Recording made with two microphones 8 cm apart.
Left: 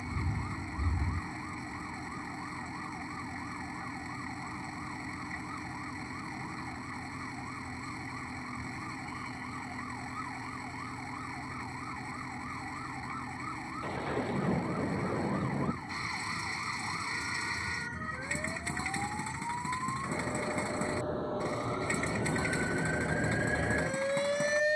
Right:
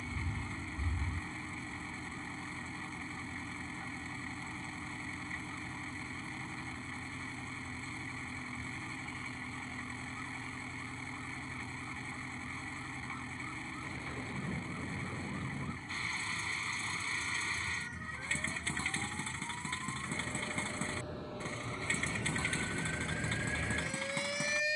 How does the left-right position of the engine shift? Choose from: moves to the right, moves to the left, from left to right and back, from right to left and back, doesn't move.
doesn't move.